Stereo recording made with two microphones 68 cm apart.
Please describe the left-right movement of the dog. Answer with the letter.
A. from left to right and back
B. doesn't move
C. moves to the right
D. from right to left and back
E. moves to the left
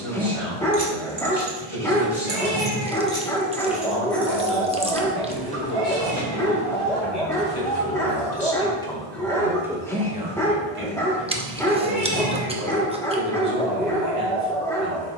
B.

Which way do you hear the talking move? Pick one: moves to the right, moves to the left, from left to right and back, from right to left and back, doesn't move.
moves to the right.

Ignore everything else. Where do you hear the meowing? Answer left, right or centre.
right.